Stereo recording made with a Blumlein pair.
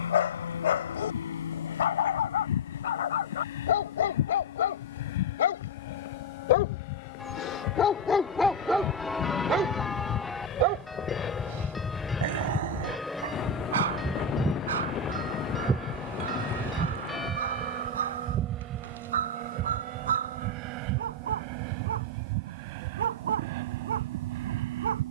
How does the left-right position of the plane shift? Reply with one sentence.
In this clip you hear the plane go from the left side to the right.